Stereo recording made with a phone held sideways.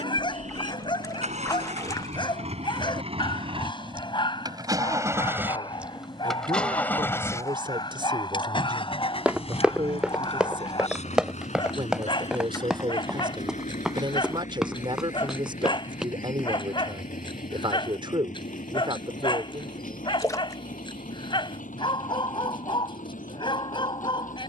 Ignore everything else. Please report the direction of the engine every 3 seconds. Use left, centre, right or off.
right, right, left, left, left, left, left, left.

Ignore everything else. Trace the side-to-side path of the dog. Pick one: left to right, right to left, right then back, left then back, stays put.
stays put.